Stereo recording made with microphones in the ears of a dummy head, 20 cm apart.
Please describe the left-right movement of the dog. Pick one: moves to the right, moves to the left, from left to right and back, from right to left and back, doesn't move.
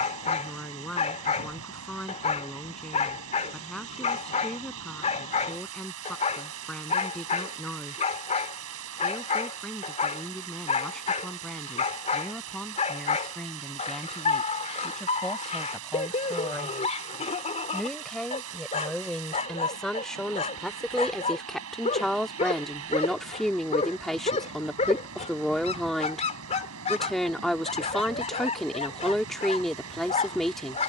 doesn't move.